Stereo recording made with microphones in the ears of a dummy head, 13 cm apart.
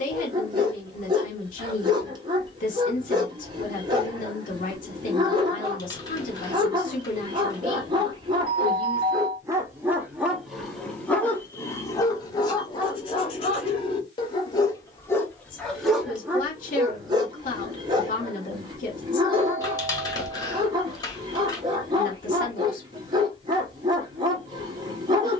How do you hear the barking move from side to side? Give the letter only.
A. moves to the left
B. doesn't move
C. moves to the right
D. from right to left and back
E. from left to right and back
D.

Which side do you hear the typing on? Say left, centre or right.
left.